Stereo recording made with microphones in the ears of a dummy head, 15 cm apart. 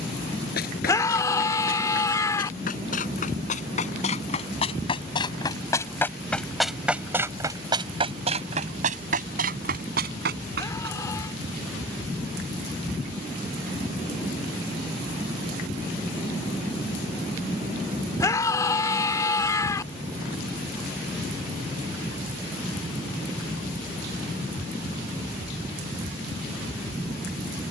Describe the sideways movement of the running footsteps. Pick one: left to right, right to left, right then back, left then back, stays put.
left to right.